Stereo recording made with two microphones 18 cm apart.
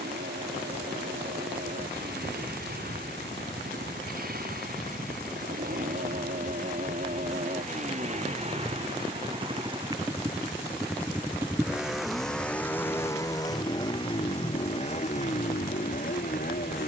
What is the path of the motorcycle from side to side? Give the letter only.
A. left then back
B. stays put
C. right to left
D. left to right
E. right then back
C.